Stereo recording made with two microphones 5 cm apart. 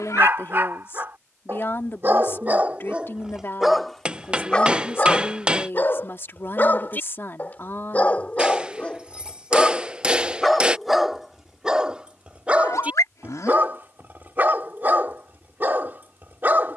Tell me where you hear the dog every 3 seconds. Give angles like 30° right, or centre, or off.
40° right, 20° left, 30° left, centre, 30° right, 40° right.